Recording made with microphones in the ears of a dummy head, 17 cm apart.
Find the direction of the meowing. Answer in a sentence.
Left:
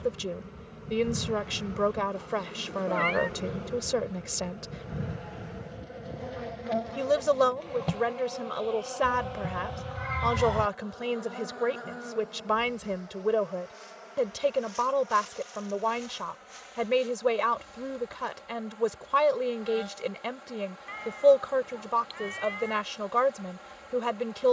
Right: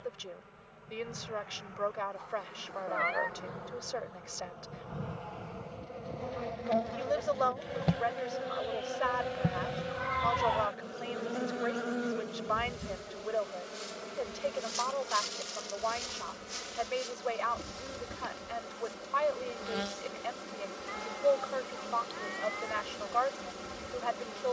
In this clip you hear the meowing on the left.